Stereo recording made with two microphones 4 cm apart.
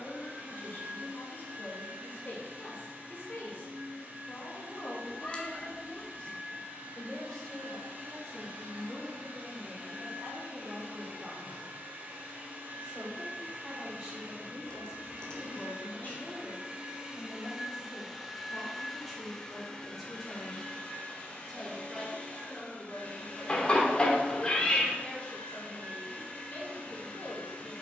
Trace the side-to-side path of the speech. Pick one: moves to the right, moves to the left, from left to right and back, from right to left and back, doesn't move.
from left to right and back.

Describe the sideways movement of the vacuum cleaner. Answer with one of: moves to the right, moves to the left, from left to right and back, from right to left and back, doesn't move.
moves to the left.